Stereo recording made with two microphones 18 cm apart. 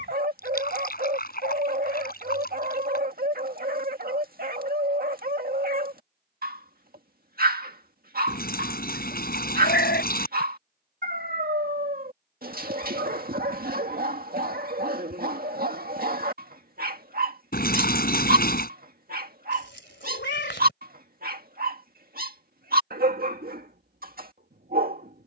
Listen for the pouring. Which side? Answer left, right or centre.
left.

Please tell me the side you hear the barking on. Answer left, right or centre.
right.